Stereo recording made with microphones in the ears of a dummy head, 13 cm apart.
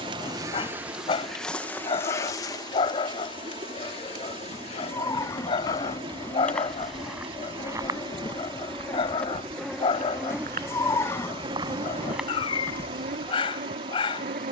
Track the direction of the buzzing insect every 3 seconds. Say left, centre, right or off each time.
centre, left, left, centre, right.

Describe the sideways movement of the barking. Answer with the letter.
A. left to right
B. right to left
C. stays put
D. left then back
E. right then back
C.